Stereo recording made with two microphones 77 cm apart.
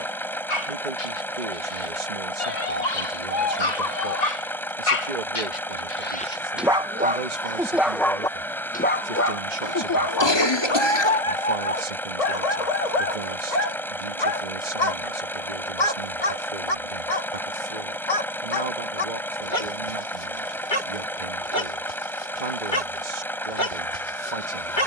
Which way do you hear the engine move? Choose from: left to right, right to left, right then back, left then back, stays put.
stays put.